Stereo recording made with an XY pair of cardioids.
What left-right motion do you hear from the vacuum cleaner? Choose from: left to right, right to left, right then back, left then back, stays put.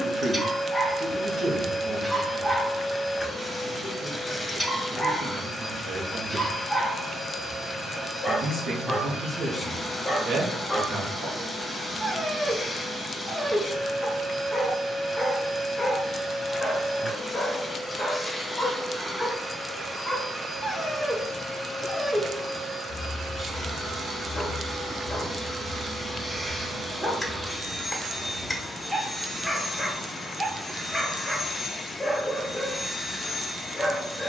right then back.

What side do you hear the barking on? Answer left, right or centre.
centre.